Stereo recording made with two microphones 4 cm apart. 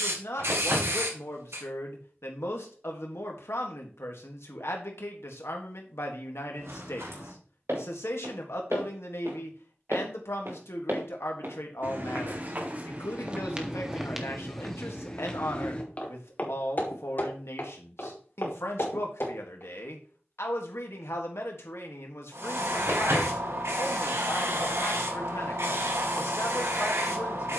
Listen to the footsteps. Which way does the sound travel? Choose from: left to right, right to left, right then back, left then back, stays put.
right to left.